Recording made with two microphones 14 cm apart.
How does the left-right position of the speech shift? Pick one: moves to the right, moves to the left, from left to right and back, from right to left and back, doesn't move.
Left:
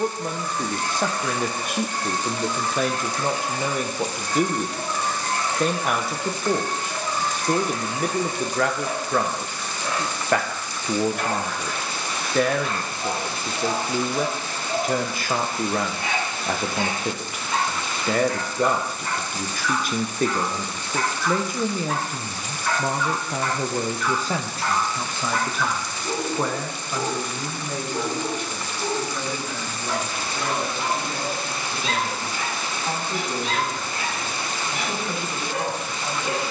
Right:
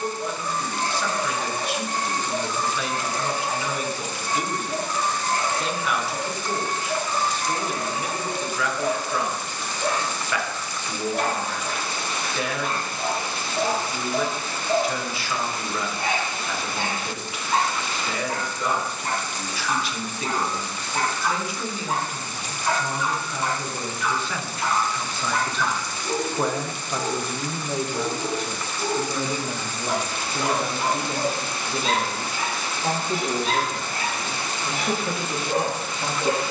moves to the right.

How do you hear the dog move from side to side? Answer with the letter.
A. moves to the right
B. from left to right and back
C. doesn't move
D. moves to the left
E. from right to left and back
E.